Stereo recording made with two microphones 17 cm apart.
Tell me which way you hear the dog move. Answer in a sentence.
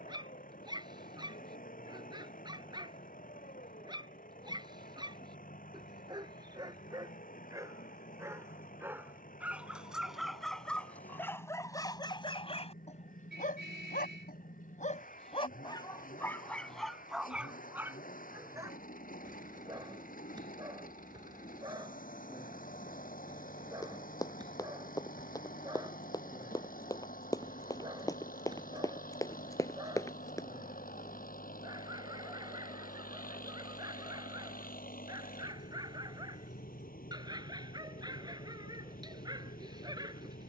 In this clip you hear the dog go left and come back.